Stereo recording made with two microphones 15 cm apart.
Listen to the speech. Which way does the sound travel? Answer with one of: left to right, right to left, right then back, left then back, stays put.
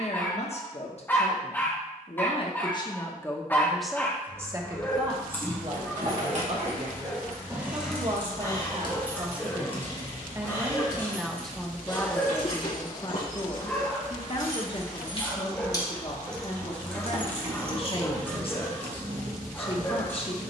right then back.